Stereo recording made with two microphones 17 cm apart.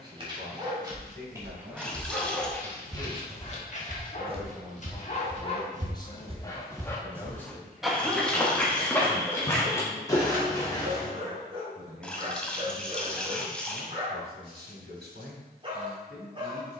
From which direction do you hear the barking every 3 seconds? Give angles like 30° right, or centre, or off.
10° right, 40° left, 10° left, 20° right, 30° right, 30° right.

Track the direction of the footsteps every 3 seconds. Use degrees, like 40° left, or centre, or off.
20° left, 30° right, 10° right, 20° left, off, off.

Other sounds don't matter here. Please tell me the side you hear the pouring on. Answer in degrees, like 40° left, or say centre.
10° left.